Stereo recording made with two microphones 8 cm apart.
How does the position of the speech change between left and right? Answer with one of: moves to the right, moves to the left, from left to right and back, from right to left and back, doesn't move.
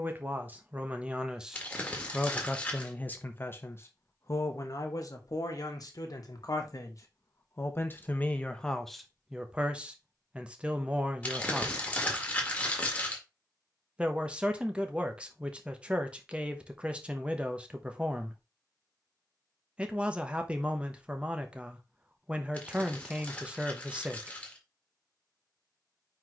from right to left and back.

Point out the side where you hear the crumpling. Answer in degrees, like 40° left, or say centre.
20° left.